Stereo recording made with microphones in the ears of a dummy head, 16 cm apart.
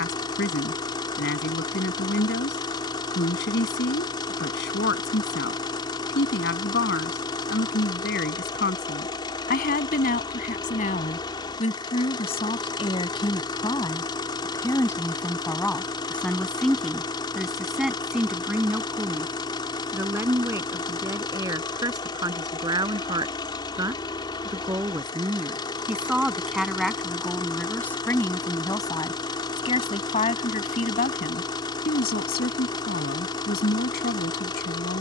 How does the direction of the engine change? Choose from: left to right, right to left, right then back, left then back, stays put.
stays put.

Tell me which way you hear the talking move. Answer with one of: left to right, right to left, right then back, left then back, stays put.
right then back.